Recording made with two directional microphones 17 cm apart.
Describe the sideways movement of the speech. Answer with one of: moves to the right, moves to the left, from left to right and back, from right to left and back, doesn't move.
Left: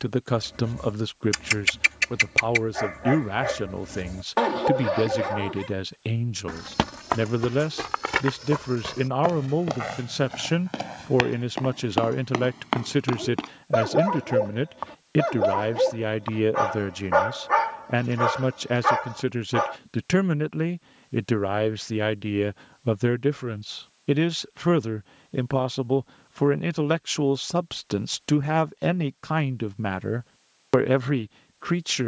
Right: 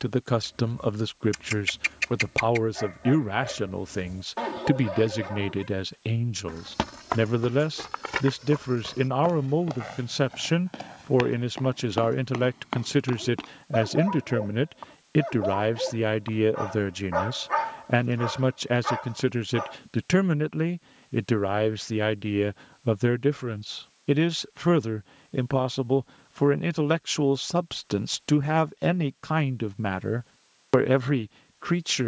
doesn't move.